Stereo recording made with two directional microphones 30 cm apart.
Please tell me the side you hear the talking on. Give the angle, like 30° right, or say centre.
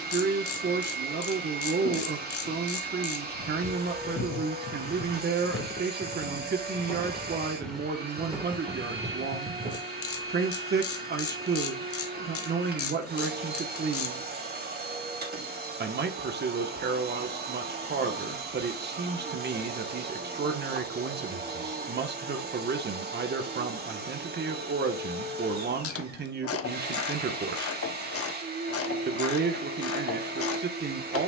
40° right.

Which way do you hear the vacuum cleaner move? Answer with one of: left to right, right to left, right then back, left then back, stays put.
stays put.